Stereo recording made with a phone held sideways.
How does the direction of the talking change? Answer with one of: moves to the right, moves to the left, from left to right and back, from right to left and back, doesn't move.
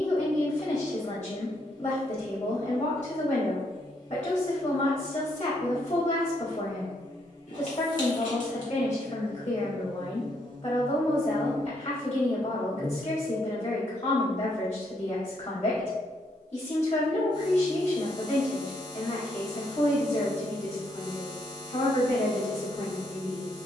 doesn't move.